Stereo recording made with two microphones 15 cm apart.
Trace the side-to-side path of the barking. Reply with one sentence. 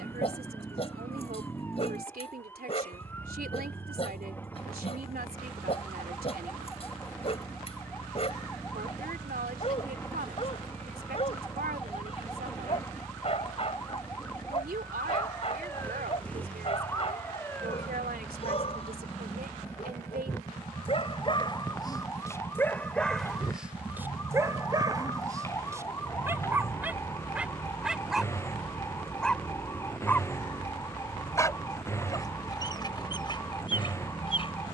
In this clip you hear the barking move from left to right and back again.